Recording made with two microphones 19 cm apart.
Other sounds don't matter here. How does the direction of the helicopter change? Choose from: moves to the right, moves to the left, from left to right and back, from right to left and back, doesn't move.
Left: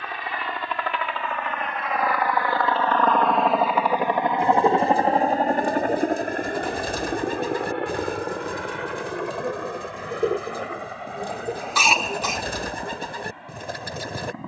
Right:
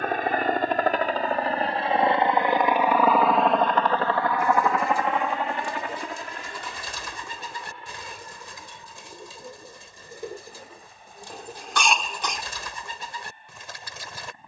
moves to the left.